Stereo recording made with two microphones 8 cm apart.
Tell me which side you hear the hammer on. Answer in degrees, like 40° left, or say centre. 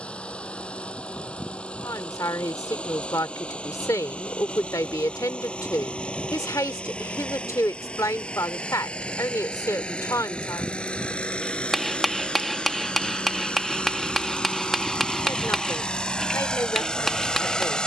centre.